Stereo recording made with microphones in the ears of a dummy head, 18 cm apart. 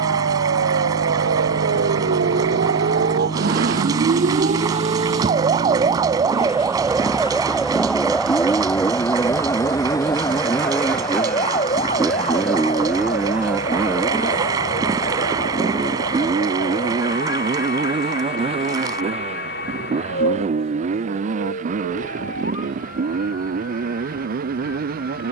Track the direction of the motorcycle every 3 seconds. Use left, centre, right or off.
left, left, left, centre, centre, right, right, right, right.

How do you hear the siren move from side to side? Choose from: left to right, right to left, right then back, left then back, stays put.
right to left.